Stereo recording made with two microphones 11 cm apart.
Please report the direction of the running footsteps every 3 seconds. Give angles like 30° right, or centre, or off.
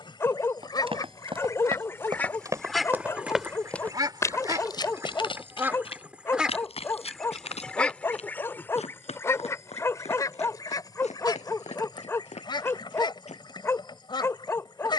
40° right, 30° left, 70° left, 80° left, 80° left.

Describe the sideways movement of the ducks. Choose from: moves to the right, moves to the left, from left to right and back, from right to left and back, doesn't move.
from left to right and back.